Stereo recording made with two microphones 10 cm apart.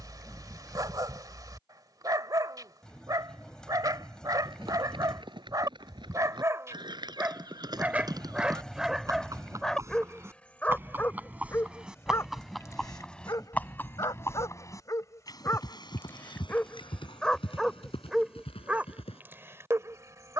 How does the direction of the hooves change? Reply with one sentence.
In this clip you hear the hooves go from the right side to the left.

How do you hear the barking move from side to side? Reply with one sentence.
In this clip you hear the barking go left and come back.